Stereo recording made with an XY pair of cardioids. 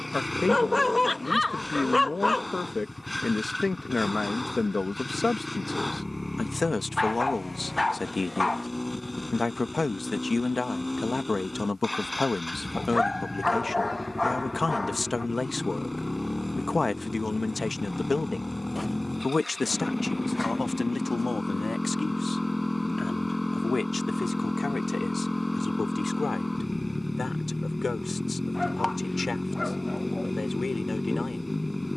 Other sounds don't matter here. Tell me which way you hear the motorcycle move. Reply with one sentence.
In this clip you hear the motorcycle stay in one place.